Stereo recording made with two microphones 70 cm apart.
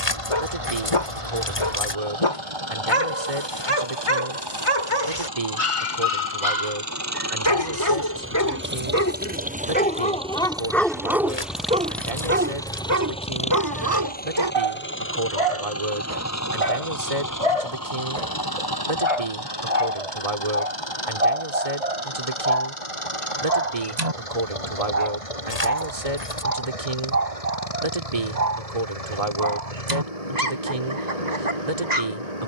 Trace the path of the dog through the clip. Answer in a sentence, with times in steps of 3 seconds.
You can hear the dog on the left from 0 s, in the centre from 9 s and on the right from 12 s.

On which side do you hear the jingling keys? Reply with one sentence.
You can hear the jingling keys on the left.